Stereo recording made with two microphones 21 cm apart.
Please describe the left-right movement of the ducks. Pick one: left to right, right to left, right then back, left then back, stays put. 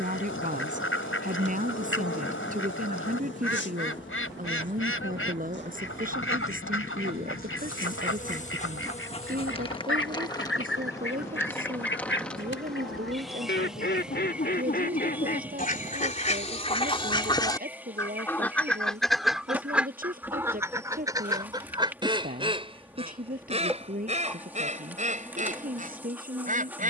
left to right.